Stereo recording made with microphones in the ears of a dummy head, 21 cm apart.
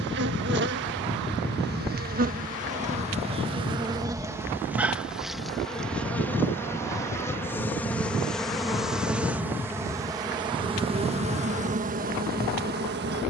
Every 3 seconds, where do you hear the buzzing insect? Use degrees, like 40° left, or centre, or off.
50° right, 10° right, 10° left, 20° right, 40° right.